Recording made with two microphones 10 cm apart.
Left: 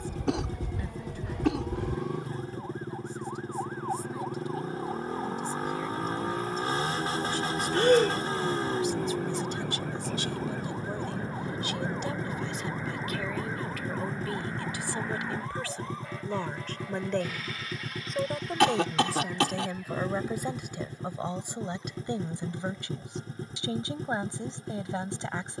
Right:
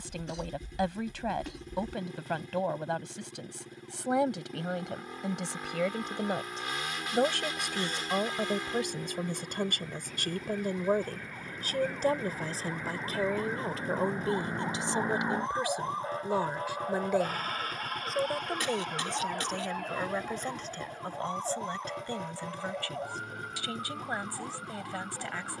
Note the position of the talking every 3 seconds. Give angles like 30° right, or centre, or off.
80° right, 80° right, 70° right, 50° right, 30° right, 10° right, centre, 20° left, 20° left.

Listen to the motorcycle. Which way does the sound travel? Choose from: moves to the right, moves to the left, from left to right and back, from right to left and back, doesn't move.
doesn't move.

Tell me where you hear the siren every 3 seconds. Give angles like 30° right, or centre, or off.
80° left, 70° left, 60° left, 40° left, centre, 40° right, 50° right, 60° right, 70° right.